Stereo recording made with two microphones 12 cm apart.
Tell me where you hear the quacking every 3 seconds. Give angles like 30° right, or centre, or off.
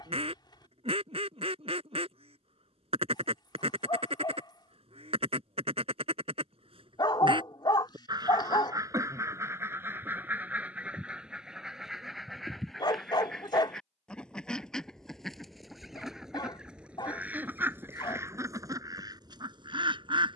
50° right, 50° right, 40° right, 10° right, centre, 10° right, 30° right.